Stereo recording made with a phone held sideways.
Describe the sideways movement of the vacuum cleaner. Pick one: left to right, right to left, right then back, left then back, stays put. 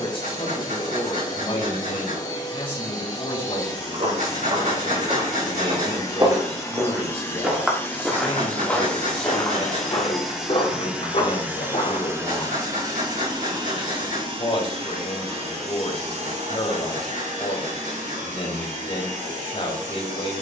left to right.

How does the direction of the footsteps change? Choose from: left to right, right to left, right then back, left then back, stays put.
right to left.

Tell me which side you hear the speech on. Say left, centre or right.
left.